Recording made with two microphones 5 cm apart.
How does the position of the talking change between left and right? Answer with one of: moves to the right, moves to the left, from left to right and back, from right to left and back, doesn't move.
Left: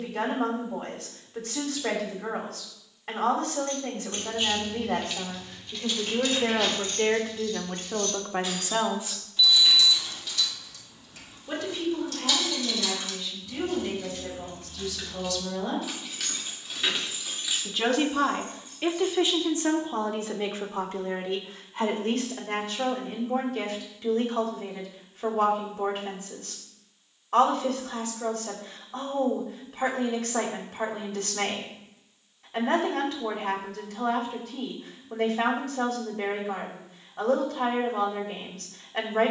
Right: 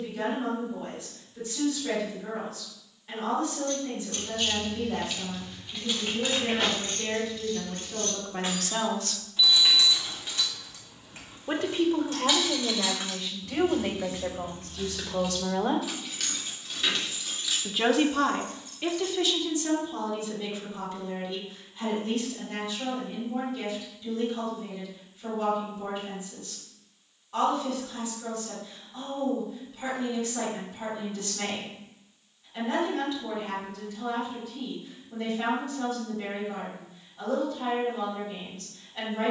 from left to right and back.